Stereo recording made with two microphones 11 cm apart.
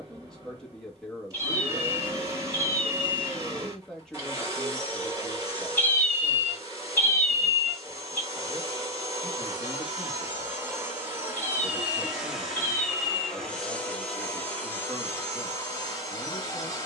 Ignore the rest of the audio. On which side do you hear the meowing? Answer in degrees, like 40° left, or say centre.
20° left.